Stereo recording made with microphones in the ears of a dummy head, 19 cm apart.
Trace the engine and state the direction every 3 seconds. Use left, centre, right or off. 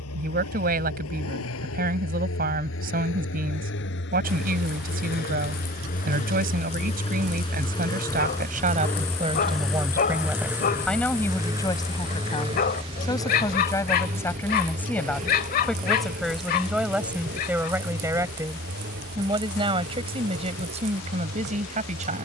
left, left, left, centre, right, right, right, right.